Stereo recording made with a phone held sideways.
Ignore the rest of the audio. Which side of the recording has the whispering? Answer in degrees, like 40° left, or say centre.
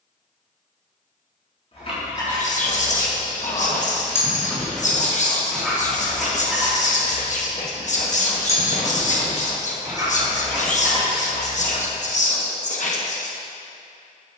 60° left.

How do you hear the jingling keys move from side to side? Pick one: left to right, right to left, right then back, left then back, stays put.
left to right.